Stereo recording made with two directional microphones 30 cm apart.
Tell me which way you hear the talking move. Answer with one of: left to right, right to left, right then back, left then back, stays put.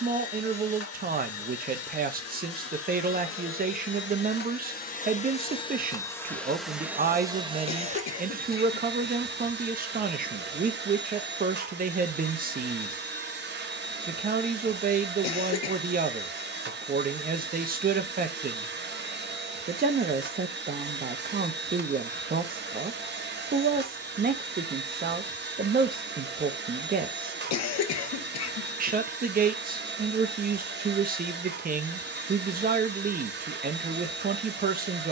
stays put.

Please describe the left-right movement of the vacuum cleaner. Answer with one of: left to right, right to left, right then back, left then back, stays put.
left to right.